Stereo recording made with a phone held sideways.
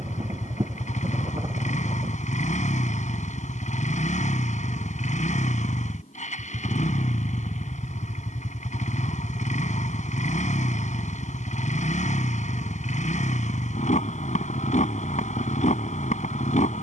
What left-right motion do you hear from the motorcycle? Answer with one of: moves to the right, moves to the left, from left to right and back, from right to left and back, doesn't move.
doesn't move.